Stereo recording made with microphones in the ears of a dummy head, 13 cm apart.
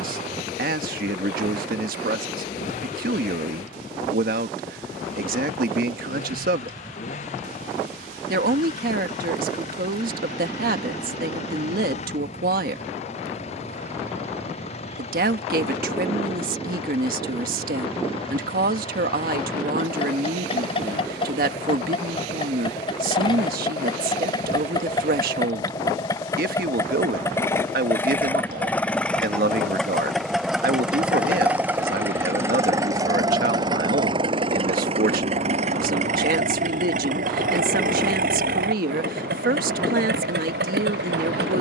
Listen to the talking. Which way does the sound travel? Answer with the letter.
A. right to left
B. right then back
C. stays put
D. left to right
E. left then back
C.